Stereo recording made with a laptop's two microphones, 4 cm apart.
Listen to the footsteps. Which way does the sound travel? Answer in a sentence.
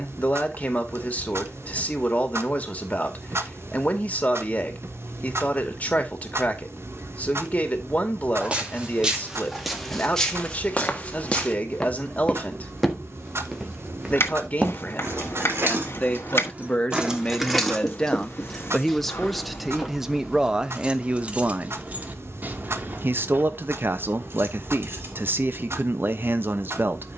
In this clip you hear the footsteps move from right to left and back again.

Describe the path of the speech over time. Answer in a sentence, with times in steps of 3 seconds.
In this clip you hear the speech on the left from 0 s, in the centre from 18 s and on the right from 21 s.